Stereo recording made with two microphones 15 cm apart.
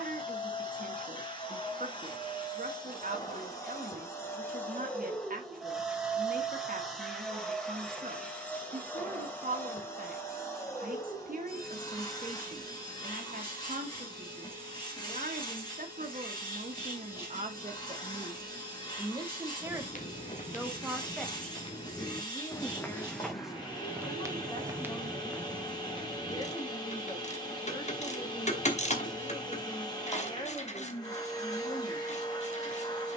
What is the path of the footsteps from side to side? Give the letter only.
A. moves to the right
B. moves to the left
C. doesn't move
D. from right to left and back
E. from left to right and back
E.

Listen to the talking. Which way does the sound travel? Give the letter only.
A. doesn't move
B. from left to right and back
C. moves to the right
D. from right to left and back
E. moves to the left
E.